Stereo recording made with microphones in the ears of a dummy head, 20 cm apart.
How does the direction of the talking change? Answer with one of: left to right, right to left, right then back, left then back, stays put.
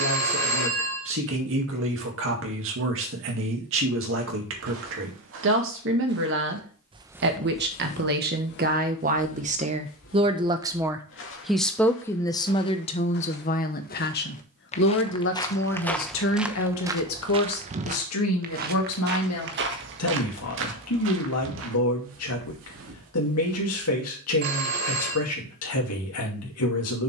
right to left.